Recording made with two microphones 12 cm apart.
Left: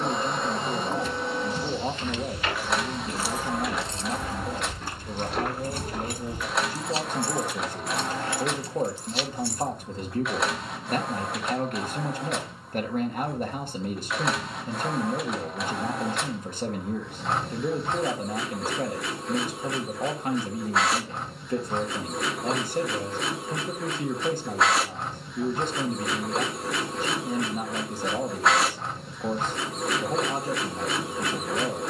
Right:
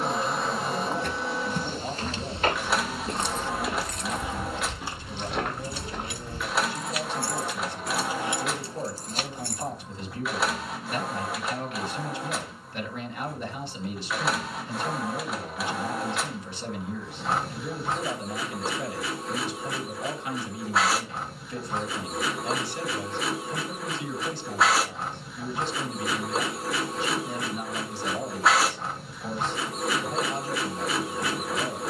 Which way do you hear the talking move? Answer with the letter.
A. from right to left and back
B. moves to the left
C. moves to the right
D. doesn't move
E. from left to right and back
D.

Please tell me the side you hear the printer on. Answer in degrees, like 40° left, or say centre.
centre.